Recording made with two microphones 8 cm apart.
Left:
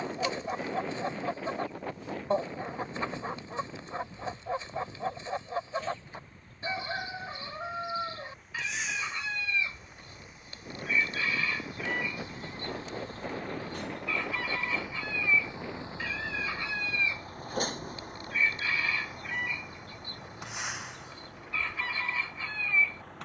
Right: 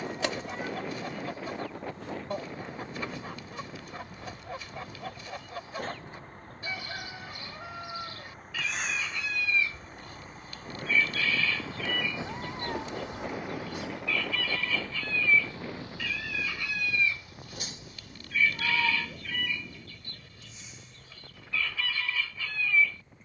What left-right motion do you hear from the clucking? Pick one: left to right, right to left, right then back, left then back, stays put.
stays put.